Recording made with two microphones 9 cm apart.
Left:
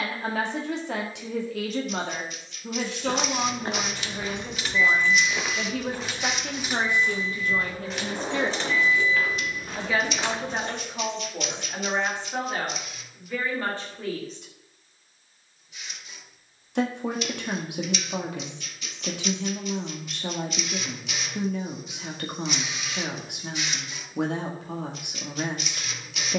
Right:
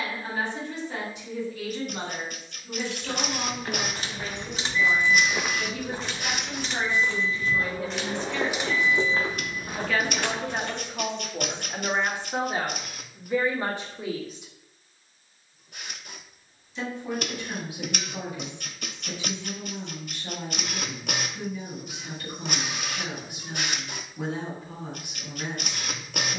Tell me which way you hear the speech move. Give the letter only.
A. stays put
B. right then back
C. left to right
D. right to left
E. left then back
B.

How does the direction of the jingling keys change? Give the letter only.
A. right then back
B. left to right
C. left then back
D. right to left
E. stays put
C.